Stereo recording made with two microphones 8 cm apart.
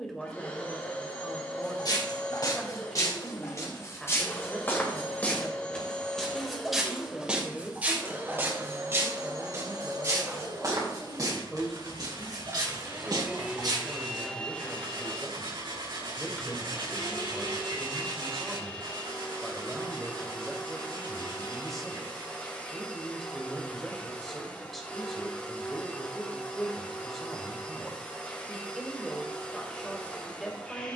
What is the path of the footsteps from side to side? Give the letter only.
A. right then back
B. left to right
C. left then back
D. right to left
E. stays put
B.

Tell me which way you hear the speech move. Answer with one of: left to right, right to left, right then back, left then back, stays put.
stays put.